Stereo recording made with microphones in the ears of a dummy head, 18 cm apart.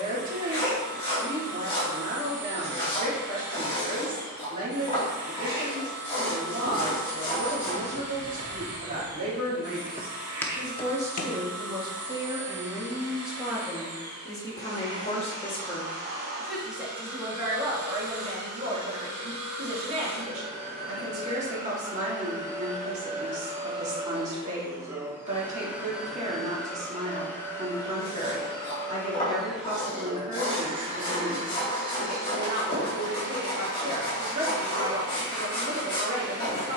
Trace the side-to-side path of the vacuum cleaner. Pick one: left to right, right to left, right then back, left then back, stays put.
left then back.